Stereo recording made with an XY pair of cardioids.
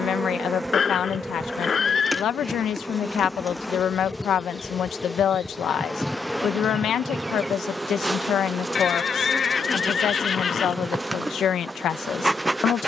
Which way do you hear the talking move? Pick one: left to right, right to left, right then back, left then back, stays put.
stays put.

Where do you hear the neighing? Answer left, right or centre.
left.